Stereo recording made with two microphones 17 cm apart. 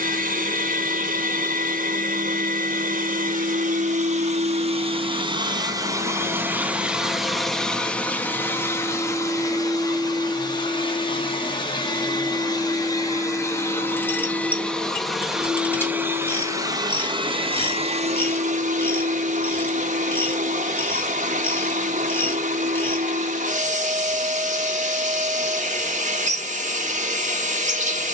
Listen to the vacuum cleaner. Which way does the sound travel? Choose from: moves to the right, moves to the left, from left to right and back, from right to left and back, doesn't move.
from right to left and back.